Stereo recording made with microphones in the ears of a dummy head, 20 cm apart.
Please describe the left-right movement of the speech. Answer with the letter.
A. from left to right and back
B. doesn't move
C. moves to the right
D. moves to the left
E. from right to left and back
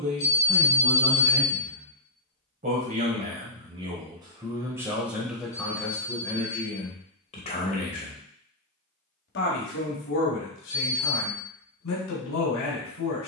D.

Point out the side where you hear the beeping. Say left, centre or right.
left.